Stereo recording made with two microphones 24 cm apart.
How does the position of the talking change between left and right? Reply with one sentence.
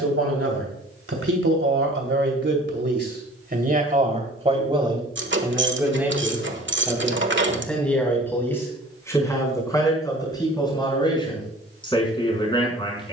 In this clip you hear the talking go from the right side to the left.